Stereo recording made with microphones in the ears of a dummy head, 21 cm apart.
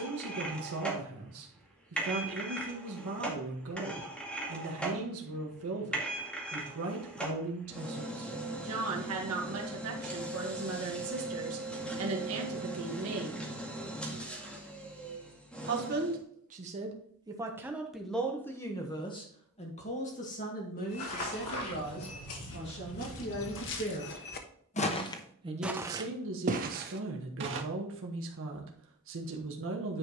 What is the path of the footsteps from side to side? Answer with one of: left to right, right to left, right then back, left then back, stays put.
left to right.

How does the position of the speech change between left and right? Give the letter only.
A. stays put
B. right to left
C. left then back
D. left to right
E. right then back
C.